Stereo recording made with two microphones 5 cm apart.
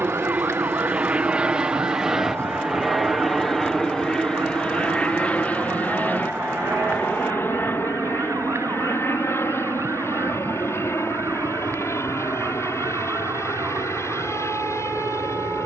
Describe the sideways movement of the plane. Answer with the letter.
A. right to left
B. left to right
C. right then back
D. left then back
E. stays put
A.